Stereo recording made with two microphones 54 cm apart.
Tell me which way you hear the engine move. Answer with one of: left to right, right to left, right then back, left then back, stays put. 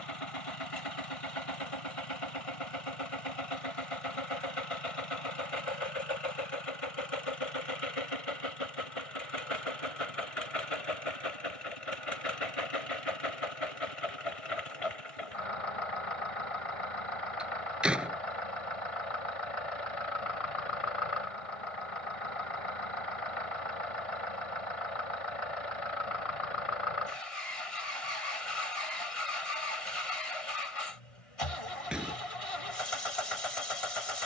stays put.